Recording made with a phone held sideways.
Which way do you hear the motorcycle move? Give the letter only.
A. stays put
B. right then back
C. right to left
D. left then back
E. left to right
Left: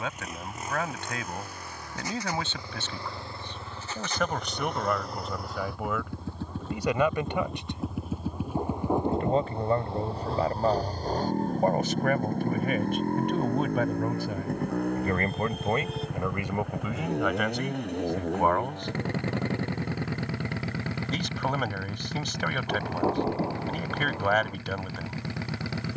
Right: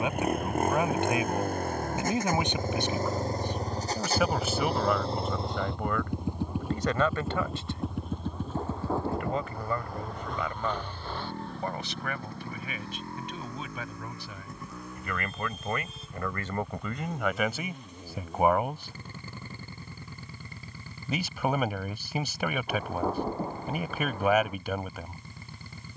C.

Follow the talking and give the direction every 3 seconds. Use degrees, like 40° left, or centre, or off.
20° right, centre, 10° left, 40° left, 50° left, 10° left, 10° right, 10° right, 10° right.